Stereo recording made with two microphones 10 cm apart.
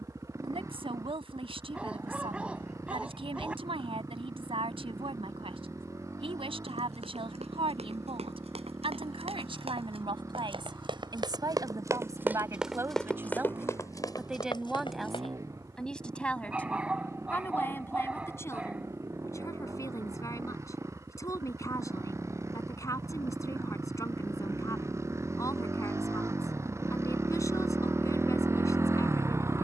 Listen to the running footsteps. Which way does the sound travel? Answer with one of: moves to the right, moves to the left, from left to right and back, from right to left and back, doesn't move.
moves to the left.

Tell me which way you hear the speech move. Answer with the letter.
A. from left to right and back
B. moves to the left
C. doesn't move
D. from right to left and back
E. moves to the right
B.